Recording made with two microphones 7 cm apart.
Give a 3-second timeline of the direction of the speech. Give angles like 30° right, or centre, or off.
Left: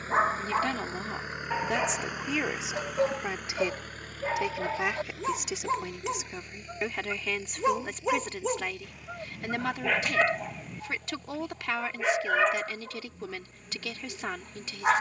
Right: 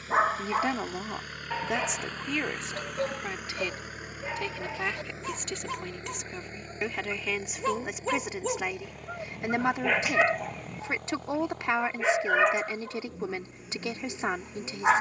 centre, 10° left, 10° right, 20° right, 20° right.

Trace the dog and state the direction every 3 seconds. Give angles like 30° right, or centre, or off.
10° left, 30° left, 20° left, 10° right, 10° right.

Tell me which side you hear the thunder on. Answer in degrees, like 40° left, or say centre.
centre.